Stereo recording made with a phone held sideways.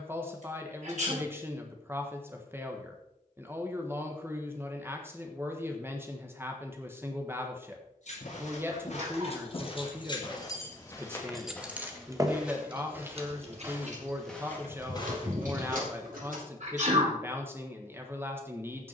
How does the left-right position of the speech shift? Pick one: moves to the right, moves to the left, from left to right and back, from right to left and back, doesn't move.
doesn't move.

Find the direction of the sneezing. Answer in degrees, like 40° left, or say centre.
60° right.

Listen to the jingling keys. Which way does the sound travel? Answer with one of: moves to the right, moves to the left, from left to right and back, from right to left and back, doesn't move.
moves to the right.